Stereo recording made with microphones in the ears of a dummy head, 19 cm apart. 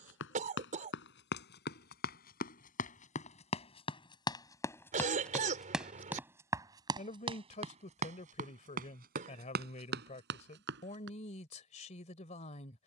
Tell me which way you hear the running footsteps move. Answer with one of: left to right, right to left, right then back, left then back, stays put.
left to right.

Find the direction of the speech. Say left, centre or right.
left.